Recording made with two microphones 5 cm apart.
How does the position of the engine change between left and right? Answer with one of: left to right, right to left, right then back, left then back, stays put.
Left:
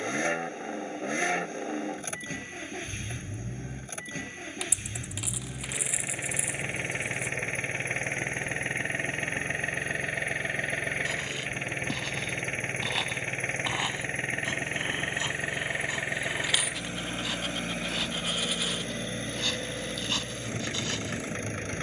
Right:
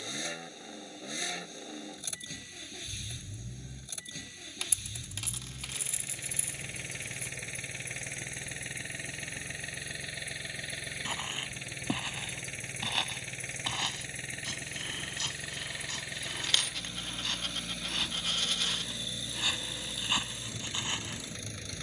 stays put.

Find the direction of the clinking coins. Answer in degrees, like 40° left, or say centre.
10° left.